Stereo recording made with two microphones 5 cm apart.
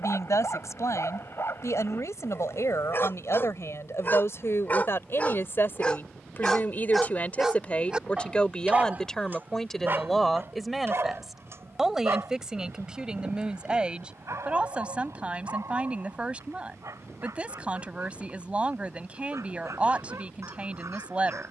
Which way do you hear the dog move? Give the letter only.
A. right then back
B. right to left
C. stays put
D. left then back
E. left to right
E.